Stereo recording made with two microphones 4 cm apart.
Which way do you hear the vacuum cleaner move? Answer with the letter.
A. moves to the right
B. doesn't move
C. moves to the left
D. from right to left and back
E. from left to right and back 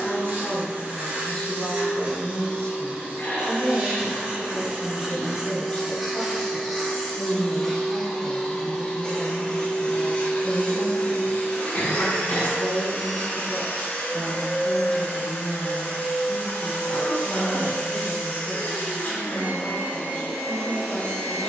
C.